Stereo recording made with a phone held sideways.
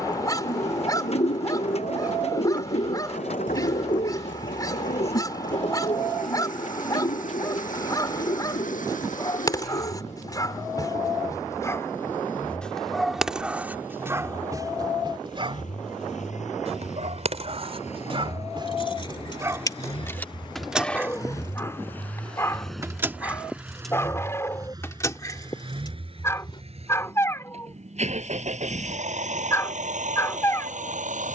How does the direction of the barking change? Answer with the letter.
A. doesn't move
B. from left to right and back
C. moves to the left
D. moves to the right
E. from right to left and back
B.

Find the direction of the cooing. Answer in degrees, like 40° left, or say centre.
50° left.